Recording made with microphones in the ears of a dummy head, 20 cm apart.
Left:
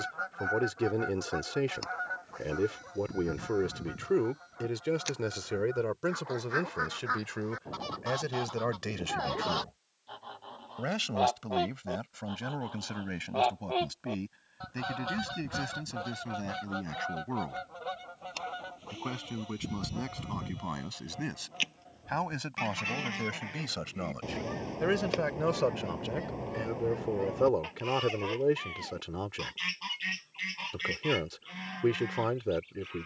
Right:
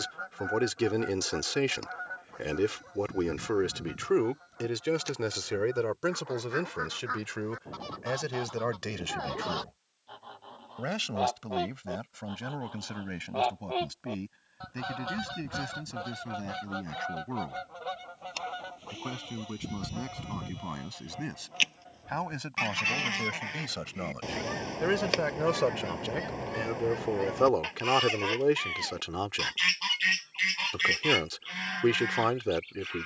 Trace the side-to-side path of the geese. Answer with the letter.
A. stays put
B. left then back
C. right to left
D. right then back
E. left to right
E.